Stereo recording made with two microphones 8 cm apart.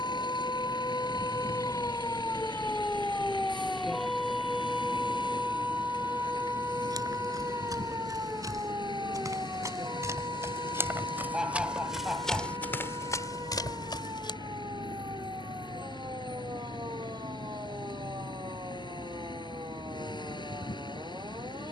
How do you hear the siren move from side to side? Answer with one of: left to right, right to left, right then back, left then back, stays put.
left to right.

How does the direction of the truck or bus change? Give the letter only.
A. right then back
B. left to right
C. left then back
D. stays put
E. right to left
D.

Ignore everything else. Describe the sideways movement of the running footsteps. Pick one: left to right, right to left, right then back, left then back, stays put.
right to left.